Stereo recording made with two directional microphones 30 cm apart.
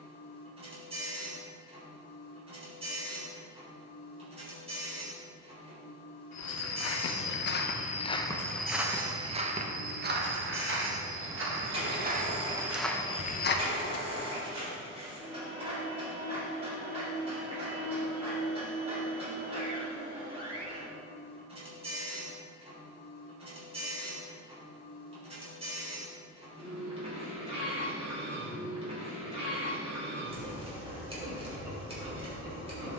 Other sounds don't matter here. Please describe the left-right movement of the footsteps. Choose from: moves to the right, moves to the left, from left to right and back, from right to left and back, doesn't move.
from left to right and back.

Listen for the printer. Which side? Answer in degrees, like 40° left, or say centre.
20° right.